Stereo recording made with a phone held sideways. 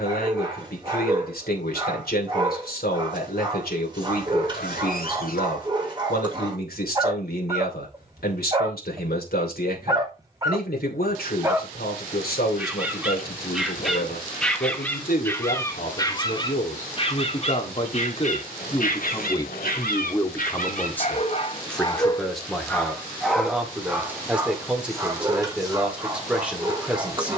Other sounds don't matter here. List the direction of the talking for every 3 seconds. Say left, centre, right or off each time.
left, left, left, left, left, left, left, centre, centre.